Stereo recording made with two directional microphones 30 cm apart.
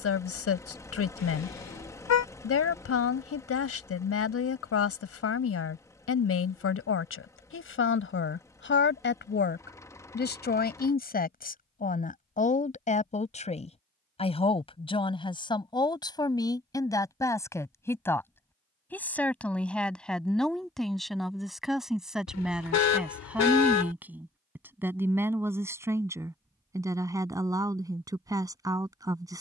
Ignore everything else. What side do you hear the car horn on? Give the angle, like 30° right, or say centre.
60° left.